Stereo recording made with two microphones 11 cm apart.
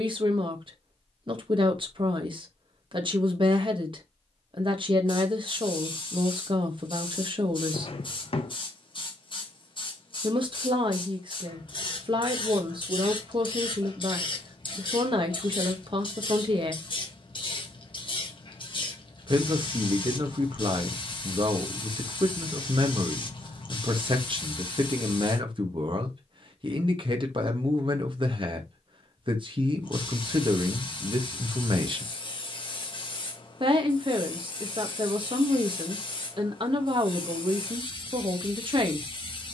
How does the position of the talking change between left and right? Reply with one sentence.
In this clip you hear the talking stay in one place.